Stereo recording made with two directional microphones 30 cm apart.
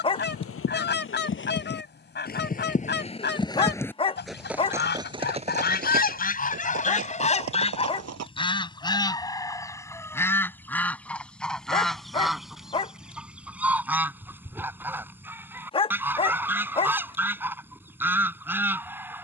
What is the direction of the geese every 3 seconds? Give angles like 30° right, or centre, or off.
40° left, 30° left, 20° left, 10° left, centre, 10° right, 10° right.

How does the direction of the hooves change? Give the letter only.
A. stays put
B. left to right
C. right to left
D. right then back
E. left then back
B.